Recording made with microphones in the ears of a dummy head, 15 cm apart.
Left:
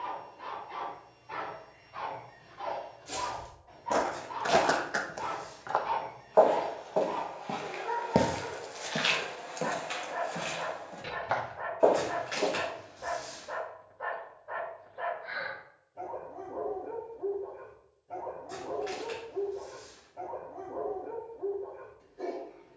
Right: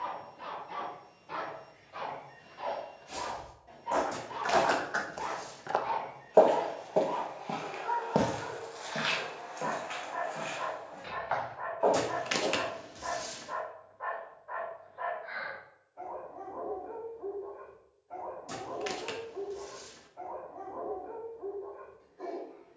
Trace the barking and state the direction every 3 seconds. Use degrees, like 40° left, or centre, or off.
50° right, 20° right, 10° left, 40° left, 40° left, 40° left, 40° left, 40° left.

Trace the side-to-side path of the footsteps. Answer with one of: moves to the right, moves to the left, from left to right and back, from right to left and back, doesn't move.
from left to right and back.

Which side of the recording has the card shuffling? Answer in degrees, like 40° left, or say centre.
80° right.